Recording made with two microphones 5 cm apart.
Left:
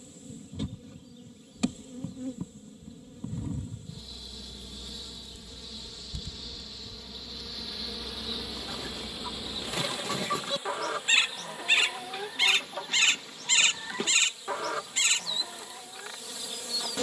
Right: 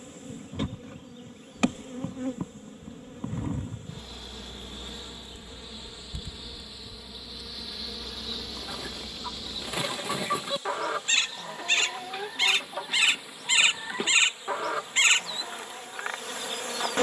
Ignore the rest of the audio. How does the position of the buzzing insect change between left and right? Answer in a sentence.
In this clip you hear the buzzing insect move from right to left and back again.